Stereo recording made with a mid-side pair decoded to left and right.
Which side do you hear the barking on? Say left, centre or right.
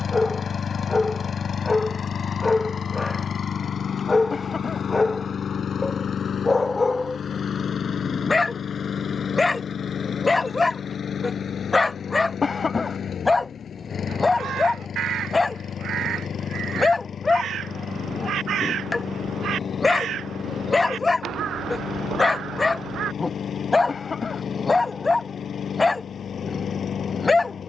left.